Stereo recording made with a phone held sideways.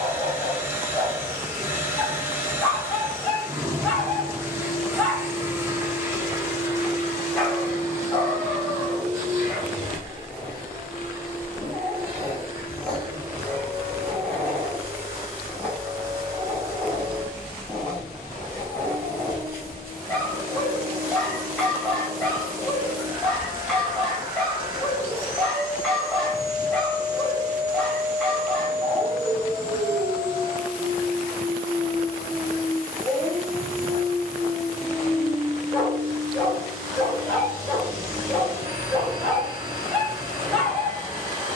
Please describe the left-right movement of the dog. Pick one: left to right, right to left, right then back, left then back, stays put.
stays put.